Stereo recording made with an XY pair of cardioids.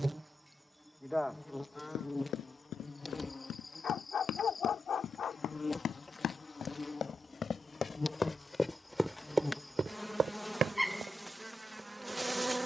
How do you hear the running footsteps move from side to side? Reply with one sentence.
You can hear the running footsteps move from left to right.